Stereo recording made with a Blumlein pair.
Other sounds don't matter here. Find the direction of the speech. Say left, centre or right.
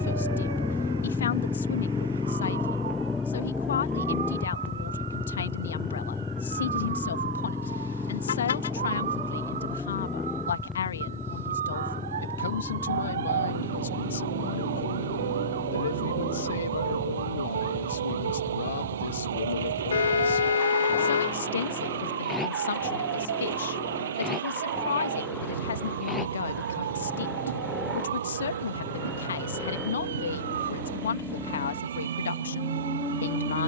left.